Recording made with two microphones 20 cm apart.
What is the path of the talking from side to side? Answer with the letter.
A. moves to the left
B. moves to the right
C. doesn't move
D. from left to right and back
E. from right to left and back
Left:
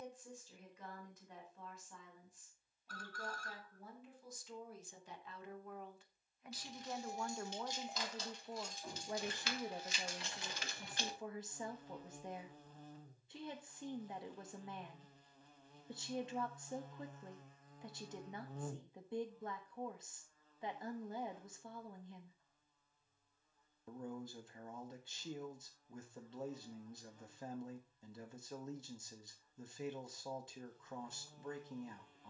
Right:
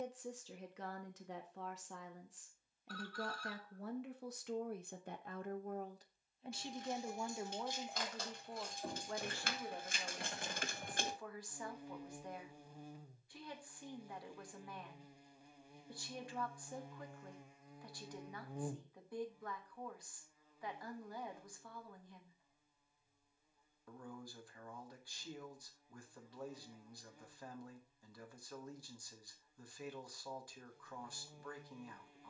A.